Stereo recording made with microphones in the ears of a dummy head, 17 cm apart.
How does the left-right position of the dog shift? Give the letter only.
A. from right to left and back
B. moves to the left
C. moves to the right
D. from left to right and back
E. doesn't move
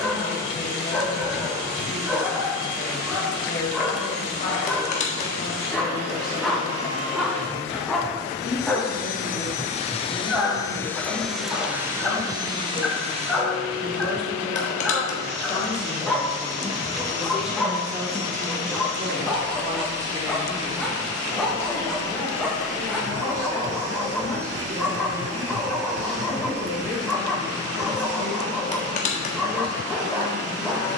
E.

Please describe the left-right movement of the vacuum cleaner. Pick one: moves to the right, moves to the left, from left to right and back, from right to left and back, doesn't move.
moves to the right.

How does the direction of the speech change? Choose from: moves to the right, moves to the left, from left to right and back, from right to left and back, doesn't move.
from left to right and back.